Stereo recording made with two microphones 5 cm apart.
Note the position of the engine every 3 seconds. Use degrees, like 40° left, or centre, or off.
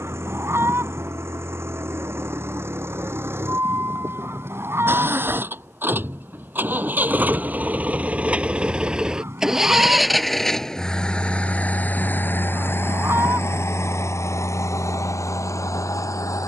50° right, 50° right, 30° right, 10° left, 50° left, 70° left.